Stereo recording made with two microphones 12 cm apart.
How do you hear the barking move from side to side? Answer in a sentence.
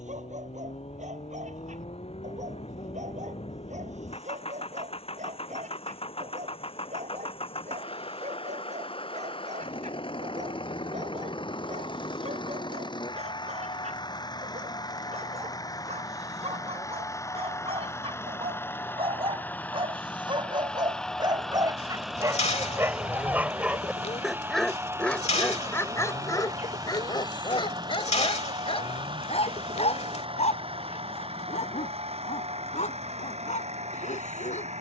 In this clip you hear the barking move from right to left.